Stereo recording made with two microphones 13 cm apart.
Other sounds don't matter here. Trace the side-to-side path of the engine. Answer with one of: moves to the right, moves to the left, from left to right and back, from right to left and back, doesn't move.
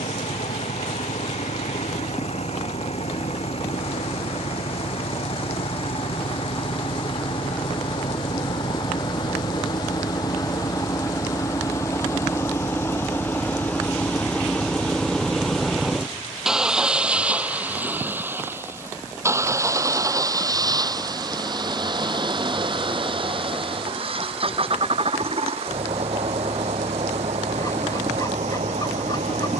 moves to the right.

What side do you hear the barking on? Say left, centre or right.
left.